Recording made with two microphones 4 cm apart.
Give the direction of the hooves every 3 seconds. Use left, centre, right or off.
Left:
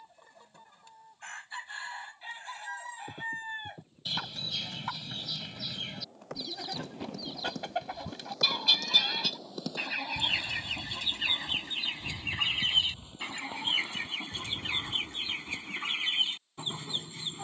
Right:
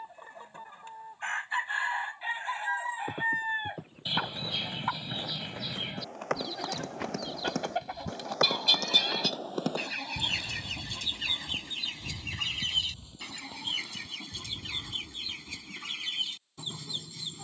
off, right, right, right, left, left.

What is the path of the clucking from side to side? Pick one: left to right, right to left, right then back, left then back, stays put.
right to left.